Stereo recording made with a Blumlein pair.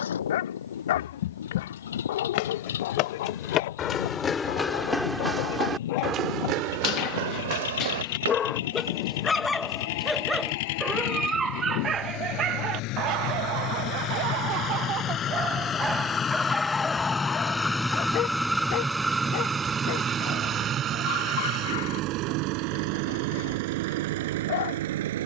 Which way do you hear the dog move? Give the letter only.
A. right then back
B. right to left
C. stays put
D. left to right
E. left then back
A.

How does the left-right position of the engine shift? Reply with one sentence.
You can hear the engine travel towards the right.